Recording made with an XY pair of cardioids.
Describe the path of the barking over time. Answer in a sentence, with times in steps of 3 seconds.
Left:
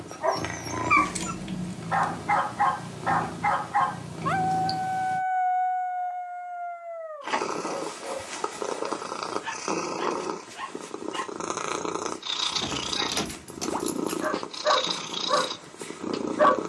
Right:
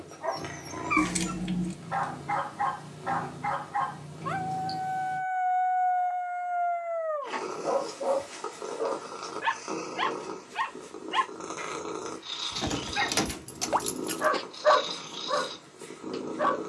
You can hear the barking on the left from 0 s, on the right from 6 s and on the left from 15 s.